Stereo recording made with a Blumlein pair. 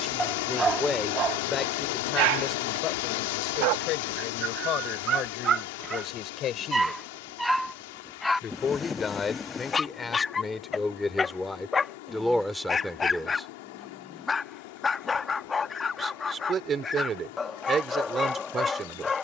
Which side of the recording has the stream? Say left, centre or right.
left.